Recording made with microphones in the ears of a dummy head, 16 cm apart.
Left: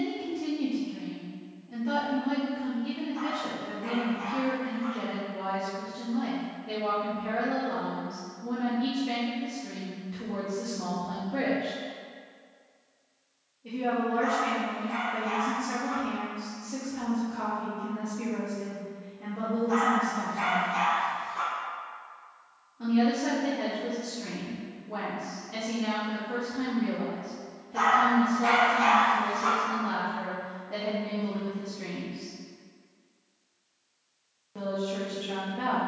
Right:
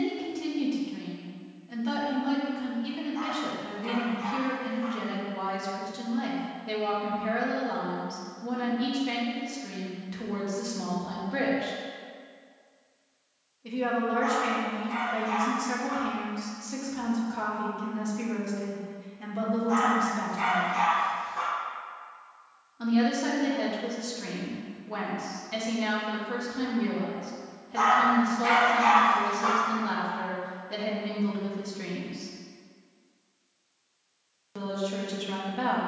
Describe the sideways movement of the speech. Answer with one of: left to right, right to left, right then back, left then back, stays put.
stays put.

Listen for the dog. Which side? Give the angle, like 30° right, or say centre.
10° left.